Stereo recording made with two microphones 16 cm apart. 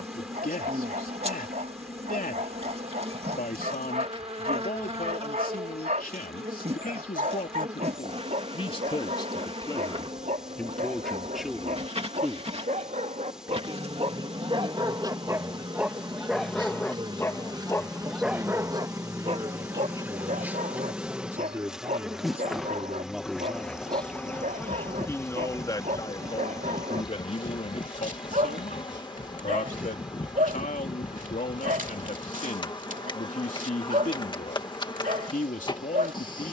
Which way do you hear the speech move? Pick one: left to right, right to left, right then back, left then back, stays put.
right then back.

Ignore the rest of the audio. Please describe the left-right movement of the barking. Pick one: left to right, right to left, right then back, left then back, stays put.
left then back.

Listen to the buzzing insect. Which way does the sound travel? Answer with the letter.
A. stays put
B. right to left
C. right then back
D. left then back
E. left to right
B.